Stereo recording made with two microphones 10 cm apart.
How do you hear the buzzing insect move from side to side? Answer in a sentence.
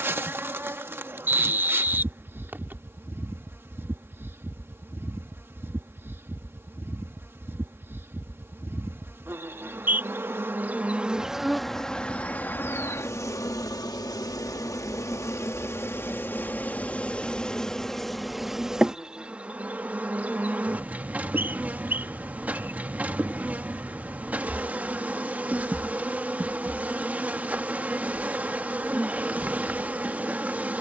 In this clip you hear the buzzing insect go left and come back.